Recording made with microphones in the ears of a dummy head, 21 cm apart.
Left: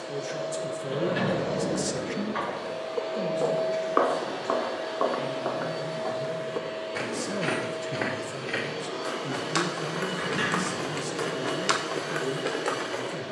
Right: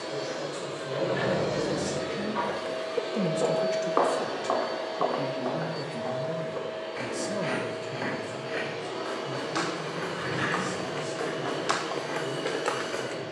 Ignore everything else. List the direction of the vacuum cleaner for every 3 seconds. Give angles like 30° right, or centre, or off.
50° right, centre, 40° left, 60° left, 60° left.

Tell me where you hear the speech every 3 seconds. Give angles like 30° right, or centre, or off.
50° left, 40° right, 10° left, 60° left, 70° left.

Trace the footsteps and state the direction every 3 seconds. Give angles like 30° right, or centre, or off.
20° right, 30° left, 70° left, 50° left, centre.